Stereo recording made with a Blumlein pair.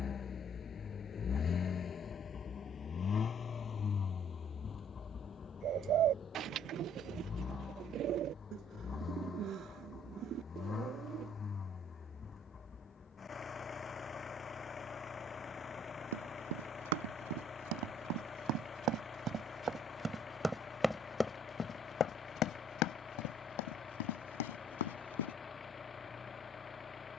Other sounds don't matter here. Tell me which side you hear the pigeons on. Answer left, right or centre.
right.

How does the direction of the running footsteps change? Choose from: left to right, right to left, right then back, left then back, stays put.
right to left.